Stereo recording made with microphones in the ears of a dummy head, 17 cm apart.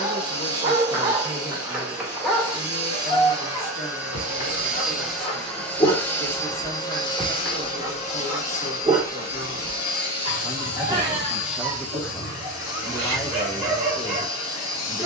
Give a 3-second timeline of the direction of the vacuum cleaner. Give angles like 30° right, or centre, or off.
20° right, 10° right, 30° left, 60° left, 70° left.